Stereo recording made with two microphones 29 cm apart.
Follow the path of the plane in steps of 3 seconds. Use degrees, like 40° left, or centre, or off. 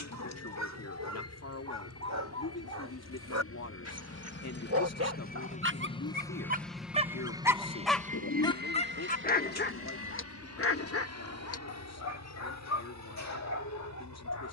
70° left, 40° left, 10° right, 50° right, 60° right.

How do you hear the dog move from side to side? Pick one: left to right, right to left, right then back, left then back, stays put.
right to left.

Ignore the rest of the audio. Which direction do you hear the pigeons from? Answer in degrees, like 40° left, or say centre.
60° left.